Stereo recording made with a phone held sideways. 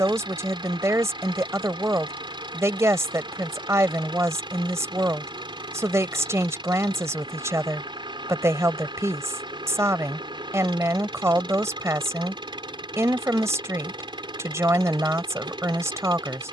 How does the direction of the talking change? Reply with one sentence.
You can hear the talking stay in one place.